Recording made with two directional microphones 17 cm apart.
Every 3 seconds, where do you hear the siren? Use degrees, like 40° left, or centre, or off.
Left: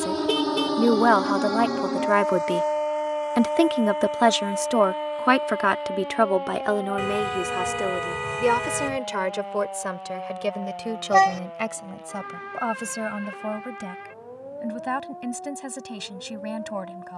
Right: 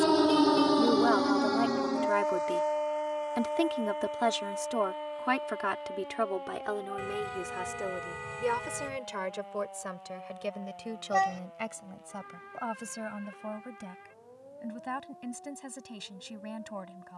20° left, 50° left, 60° left, 60° left, 70° left, 70° left.